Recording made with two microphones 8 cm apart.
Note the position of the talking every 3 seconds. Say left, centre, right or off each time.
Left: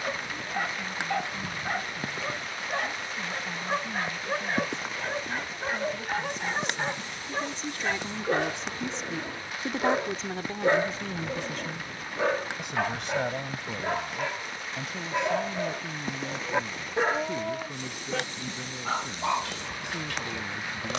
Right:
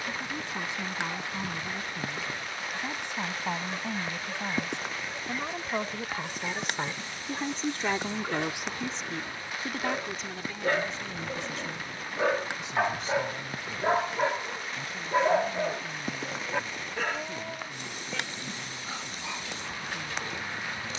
right, right, right, left, left, left, left.